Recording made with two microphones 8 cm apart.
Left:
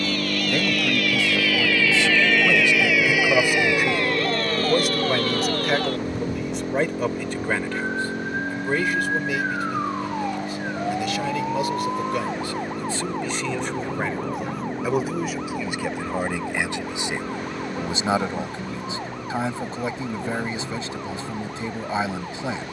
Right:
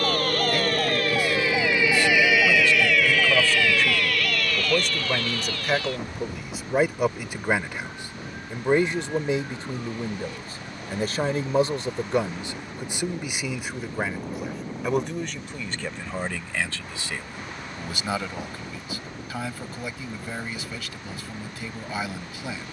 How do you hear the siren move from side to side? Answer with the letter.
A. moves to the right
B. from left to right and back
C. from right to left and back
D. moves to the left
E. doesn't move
D.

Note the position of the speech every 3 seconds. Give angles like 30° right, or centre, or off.
20° left, 10° left, 10° right, 30° right, 10° right, 10° left, 30° left, 30° left.